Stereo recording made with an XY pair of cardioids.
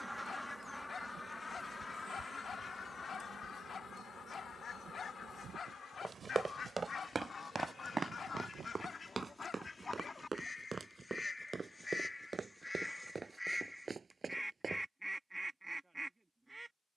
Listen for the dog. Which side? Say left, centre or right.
left.